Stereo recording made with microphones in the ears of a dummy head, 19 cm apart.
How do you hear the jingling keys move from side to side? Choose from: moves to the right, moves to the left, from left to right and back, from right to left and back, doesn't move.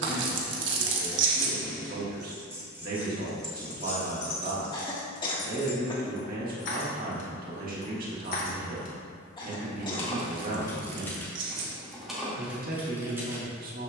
from right to left and back.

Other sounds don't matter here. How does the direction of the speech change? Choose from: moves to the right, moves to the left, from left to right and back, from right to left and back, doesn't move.
doesn't move.